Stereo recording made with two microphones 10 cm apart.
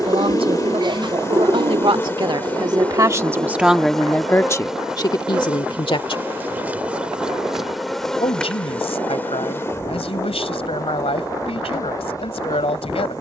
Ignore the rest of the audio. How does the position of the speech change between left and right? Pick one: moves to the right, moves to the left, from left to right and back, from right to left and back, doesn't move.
moves to the left.